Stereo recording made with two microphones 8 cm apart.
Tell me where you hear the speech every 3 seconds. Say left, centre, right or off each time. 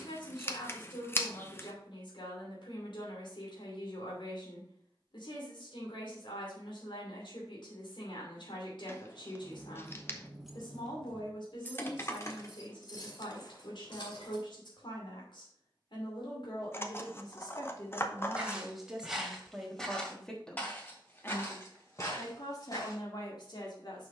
left, left, left, left, left, left, centre, left.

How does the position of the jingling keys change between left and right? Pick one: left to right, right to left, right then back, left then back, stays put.
right to left.